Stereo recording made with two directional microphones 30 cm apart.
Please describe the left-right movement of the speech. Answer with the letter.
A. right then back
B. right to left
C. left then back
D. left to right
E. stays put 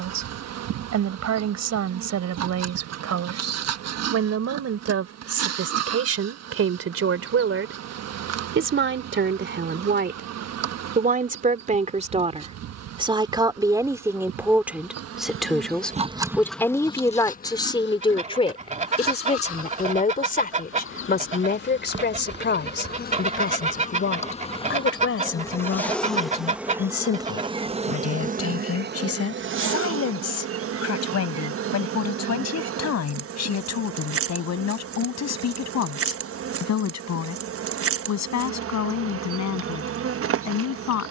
B.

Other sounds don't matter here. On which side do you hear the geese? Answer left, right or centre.
right.